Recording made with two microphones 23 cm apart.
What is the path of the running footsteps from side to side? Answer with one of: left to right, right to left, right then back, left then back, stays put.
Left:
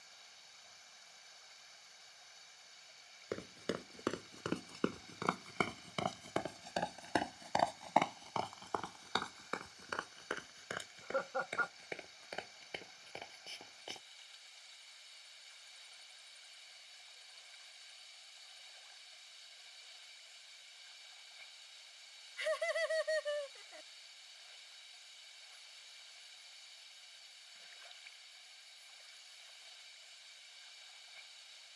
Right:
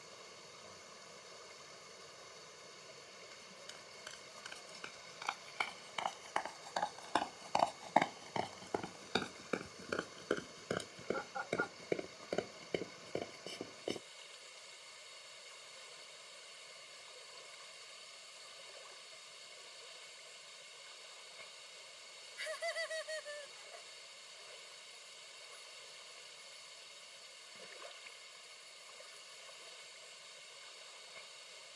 left to right.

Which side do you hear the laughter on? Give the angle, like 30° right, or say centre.
70° left.